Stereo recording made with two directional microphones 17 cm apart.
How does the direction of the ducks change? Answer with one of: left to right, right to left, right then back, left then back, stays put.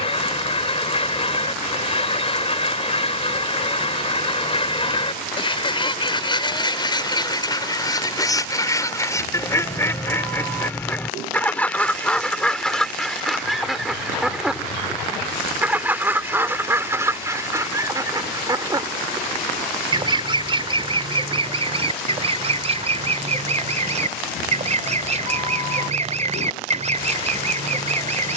left to right.